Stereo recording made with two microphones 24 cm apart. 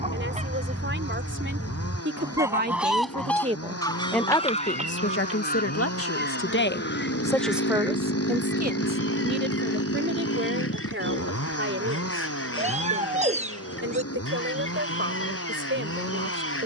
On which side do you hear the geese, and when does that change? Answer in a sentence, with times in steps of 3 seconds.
In this clip you hear the geese on the right from 0 s and on the left from 3 s.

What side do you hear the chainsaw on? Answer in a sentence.
In this clip you hear the chainsaw on the left.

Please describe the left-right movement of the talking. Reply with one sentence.
In this clip you hear the talking move from right to left and back again.